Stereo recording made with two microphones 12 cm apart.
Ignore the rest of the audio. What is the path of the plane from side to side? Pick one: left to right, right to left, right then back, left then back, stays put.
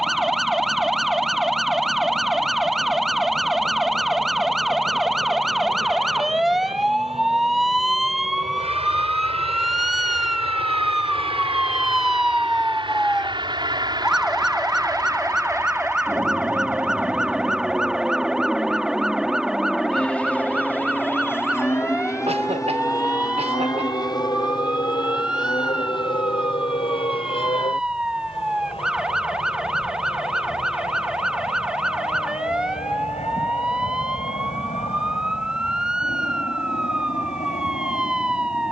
right to left.